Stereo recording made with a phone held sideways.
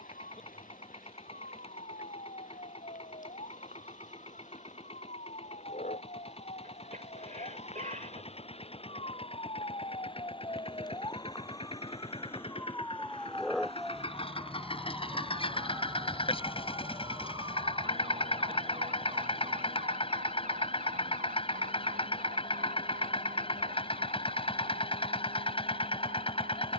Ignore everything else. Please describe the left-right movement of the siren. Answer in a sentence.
You can hear the siren move to the right.